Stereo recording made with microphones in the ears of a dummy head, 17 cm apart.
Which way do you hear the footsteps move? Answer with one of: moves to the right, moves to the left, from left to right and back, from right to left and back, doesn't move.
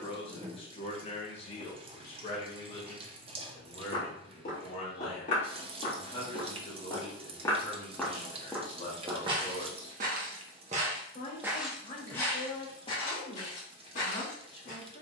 from left to right and back.